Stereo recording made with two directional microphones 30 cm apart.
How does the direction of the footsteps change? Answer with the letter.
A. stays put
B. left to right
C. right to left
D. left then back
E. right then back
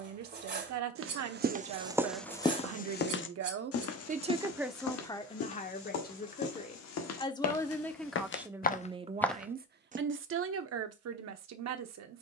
D.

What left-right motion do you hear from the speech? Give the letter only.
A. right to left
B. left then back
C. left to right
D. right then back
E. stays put
B.